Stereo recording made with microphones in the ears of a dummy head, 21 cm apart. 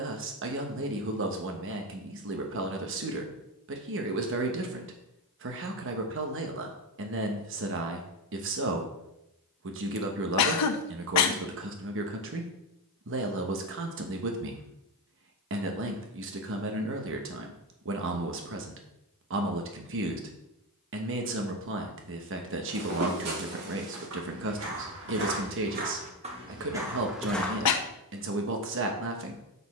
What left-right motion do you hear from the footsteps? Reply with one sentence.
In this clip you hear the footsteps travel towards the left.